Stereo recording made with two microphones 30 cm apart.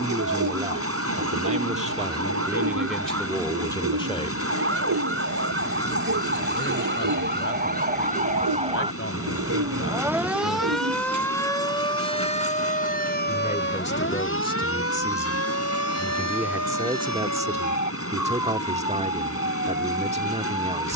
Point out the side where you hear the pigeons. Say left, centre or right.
right.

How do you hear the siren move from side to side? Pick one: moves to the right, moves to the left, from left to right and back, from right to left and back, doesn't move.
moves to the left.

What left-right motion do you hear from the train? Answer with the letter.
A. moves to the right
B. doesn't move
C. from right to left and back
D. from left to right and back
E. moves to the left
B.